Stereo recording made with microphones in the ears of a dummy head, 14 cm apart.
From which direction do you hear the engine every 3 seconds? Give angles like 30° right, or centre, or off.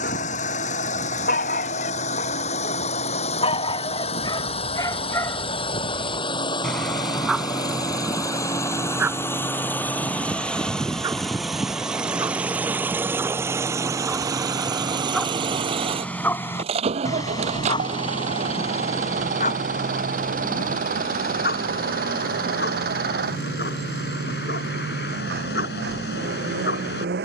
50° left, 40° left, 30° left, 10° left, 20° right, 40° right, 50° right, 60° right, 70° right.